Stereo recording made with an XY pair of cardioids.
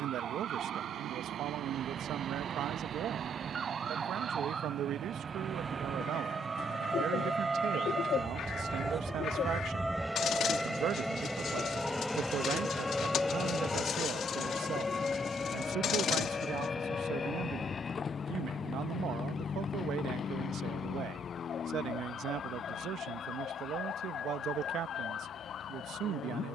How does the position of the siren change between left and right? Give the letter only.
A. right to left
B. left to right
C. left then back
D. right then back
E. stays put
A.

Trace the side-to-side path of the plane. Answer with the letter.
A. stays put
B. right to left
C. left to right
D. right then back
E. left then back
B.